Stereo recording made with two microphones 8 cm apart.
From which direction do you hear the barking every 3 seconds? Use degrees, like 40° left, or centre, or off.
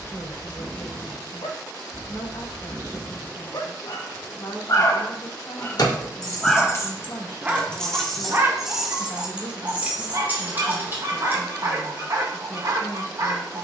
70° left, 50° left, 20° right, 40° right, 50° right.